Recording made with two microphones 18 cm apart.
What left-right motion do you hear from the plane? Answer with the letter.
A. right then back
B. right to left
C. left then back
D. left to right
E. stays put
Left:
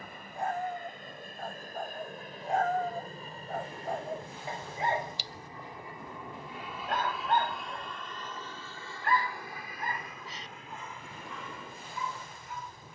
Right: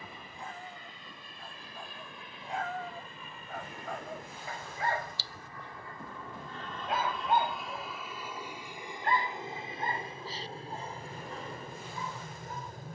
D.